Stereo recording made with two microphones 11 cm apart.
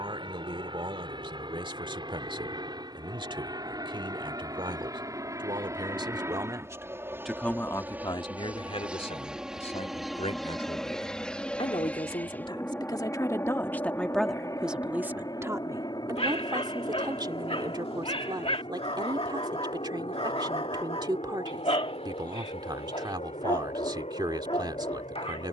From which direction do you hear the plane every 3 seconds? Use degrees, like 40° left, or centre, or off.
40° right, 30° right, 20° right, centre, 20° left, 40° left, 50° left, 60° left, 60° left.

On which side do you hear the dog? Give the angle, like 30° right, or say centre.
60° left.